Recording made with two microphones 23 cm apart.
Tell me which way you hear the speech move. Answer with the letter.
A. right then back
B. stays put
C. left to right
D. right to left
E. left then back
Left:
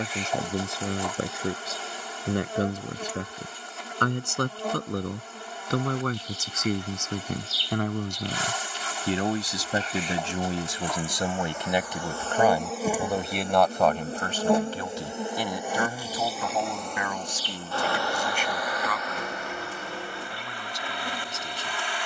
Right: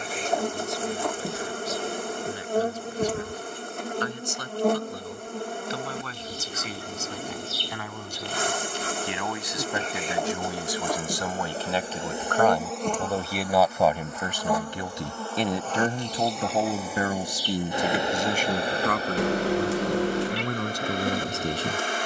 C.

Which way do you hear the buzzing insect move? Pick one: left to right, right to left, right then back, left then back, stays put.
left then back.